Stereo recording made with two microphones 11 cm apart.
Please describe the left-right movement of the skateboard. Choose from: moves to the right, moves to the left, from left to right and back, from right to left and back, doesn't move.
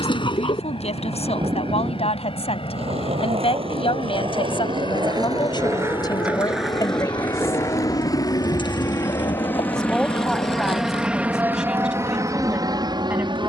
moves to the left.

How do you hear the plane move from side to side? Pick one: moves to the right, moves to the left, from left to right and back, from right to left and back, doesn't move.
moves to the right.